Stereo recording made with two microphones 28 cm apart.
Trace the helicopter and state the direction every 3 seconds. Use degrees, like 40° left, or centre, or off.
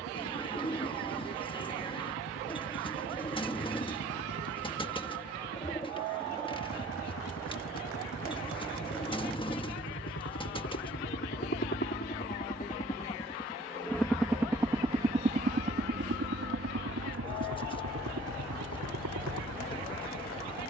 80° left, 70° left, 70° left, 50° left, 10° left, 40° right, 70° right.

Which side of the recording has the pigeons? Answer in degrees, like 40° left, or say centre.
20° left.